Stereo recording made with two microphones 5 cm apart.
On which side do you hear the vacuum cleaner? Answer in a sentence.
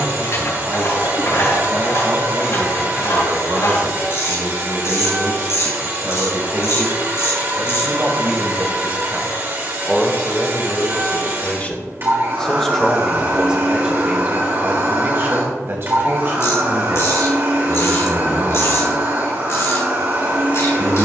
You can hear the vacuum cleaner on the right.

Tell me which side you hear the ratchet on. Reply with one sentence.
In this clip you hear the ratchet on the left.